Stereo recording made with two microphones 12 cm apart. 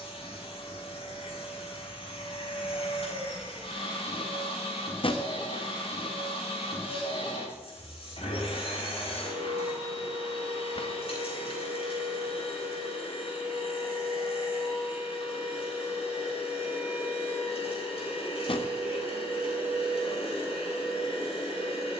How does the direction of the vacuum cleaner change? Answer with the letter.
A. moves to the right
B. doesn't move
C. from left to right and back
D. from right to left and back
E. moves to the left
B.